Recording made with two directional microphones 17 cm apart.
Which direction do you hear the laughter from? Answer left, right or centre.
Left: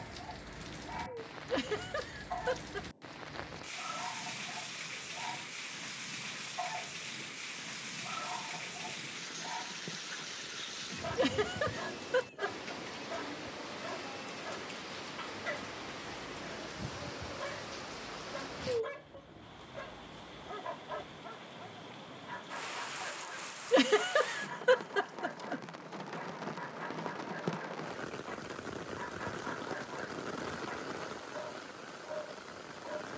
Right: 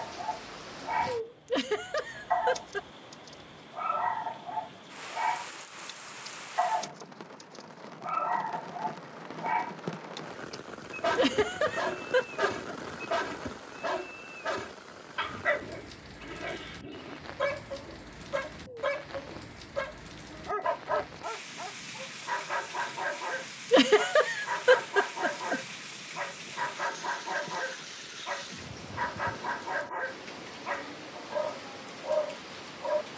right.